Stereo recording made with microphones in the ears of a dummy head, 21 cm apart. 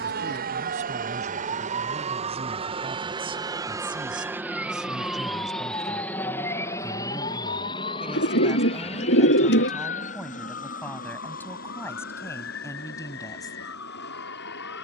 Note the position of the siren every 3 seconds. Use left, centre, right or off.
right, centre, left, left, left.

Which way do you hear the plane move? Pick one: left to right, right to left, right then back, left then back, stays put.
right to left.